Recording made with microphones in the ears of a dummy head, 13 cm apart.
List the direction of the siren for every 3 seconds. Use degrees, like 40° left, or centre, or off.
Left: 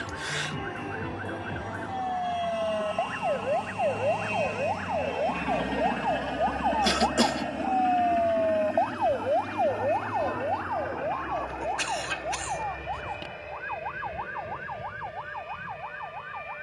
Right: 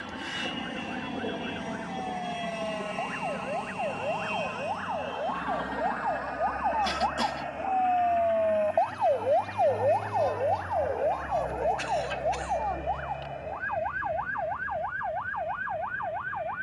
50° left, 40° left, 10° left, 20° right, 50° right, 60° right.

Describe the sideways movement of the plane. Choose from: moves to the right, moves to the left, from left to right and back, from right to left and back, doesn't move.
moves to the left.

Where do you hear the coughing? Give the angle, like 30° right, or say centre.
60° left.